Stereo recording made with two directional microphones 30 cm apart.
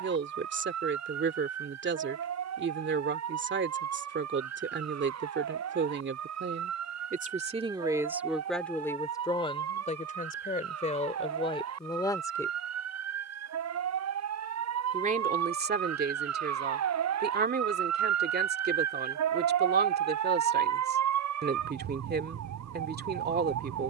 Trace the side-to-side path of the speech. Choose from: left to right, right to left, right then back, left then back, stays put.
left then back.